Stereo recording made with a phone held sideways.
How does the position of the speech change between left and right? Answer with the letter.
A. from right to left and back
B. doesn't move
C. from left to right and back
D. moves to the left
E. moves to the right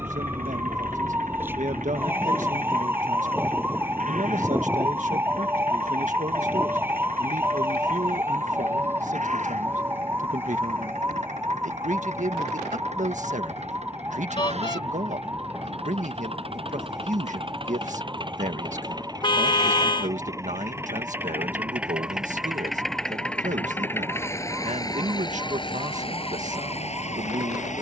B.